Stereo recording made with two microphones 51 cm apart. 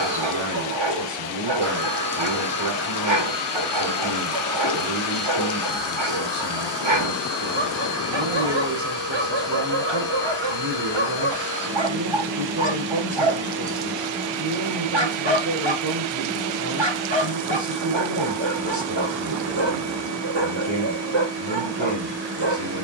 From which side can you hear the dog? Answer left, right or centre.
right.